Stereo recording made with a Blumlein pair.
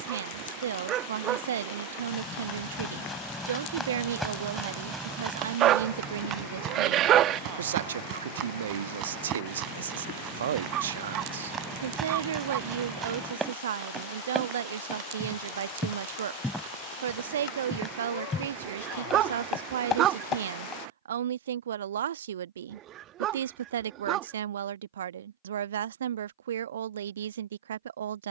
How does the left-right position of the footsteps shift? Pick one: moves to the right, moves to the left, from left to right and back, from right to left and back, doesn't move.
from left to right and back.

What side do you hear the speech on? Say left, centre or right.
right.